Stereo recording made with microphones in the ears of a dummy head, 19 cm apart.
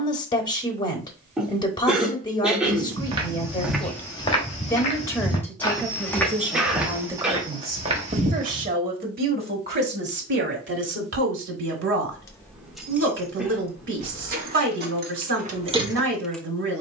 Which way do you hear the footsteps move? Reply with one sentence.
In this clip you hear the footsteps go left and come back.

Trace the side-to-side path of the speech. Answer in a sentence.
You can hear the speech move from left to right.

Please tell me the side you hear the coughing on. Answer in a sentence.
In this clip you hear the coughing in the centre.